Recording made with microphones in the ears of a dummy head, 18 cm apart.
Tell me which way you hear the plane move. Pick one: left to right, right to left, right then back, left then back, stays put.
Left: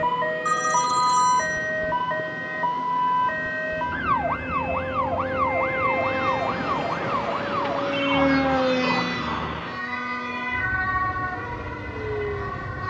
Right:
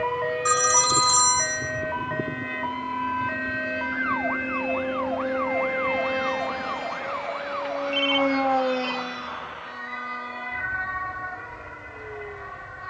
right to left.